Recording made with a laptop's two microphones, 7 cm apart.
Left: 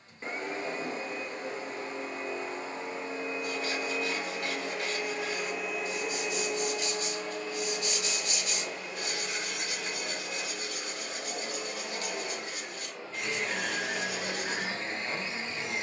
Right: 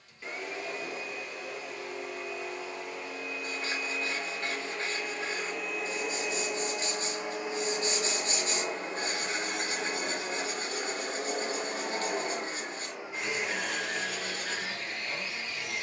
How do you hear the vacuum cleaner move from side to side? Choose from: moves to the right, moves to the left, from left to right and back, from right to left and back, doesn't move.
from left to right and back.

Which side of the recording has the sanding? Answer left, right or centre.
right.